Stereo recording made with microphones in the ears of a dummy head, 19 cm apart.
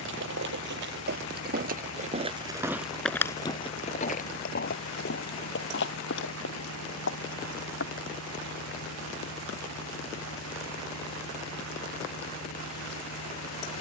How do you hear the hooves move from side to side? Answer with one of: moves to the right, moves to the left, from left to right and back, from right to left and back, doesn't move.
moves to the left.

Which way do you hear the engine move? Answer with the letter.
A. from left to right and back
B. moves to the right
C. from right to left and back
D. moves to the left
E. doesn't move
E.